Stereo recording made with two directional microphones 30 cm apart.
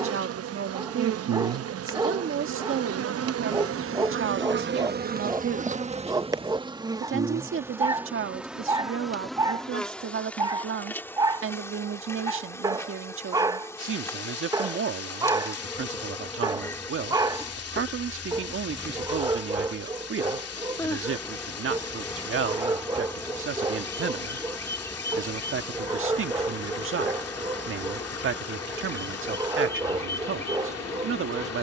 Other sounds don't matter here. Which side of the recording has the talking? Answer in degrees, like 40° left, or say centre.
40° right.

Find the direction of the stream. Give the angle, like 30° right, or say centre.
50° left.